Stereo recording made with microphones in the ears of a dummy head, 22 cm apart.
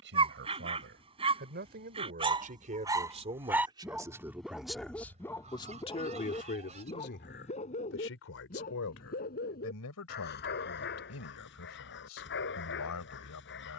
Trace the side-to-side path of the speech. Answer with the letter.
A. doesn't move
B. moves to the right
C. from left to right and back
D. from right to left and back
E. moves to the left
E.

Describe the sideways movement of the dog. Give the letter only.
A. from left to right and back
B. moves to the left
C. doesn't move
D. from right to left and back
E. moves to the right
B.